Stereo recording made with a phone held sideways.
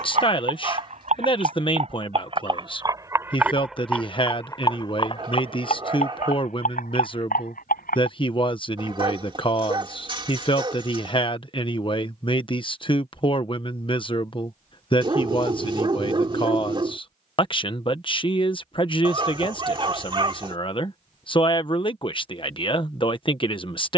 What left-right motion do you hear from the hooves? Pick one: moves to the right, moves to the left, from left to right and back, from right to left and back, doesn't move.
moves to the left.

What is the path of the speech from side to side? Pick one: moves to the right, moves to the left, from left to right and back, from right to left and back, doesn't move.
doesn't move.